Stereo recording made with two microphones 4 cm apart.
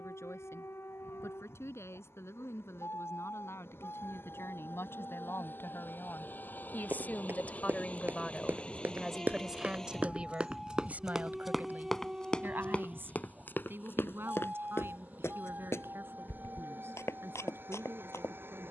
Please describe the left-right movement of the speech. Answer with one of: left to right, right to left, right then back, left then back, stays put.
left to right.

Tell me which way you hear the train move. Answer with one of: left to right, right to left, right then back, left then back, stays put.
left to right.